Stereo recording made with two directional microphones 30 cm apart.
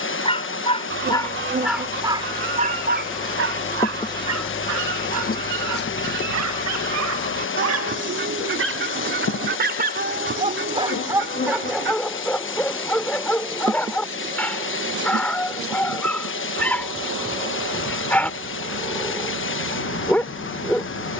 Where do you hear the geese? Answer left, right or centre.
right.